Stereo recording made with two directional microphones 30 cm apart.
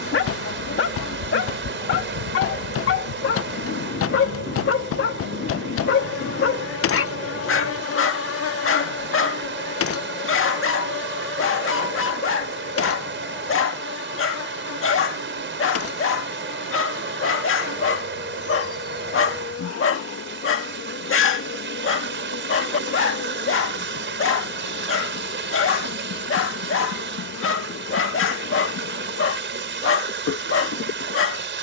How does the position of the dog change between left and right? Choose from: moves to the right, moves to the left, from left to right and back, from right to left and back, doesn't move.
doesn't move.